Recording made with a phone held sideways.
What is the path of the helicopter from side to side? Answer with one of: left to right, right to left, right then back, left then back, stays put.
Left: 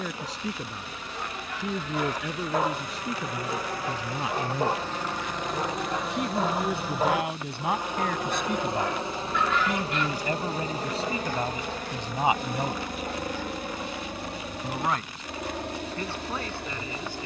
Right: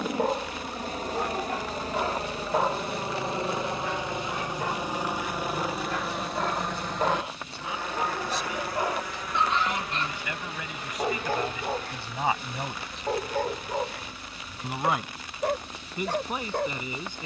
right to left.